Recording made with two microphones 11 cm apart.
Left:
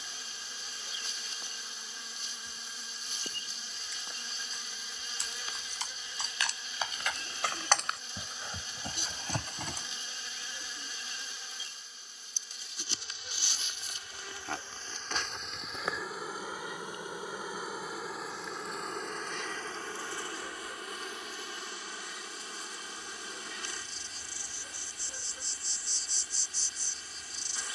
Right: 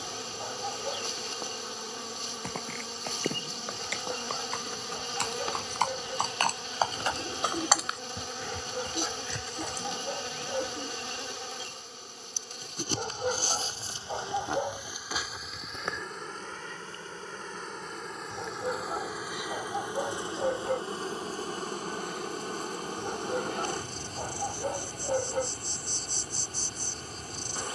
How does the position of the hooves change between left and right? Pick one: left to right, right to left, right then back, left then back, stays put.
right to left.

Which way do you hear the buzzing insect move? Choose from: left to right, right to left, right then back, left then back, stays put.
left then back.